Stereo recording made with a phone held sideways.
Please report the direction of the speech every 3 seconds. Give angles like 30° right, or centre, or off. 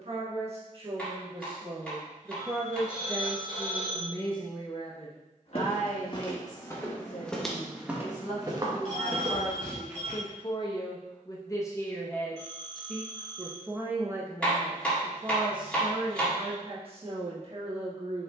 30° right, 30° left, 60° left, 40° left, 10° right, 40° right.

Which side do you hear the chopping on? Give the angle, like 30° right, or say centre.
10° left.